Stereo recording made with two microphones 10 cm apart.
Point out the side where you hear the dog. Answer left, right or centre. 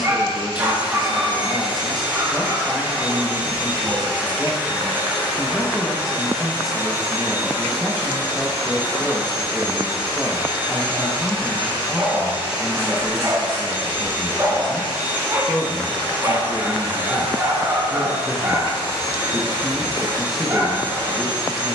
right.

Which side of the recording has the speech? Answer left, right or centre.
centre.